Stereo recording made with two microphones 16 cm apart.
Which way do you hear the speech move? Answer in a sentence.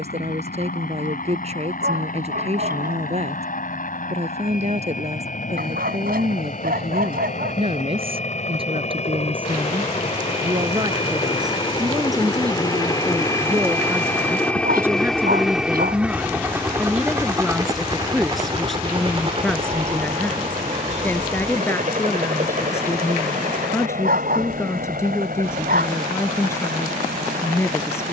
You can hear the speech move to the left.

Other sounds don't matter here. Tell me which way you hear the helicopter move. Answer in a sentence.
In this clip you hear the helicopter go from the left side to the right.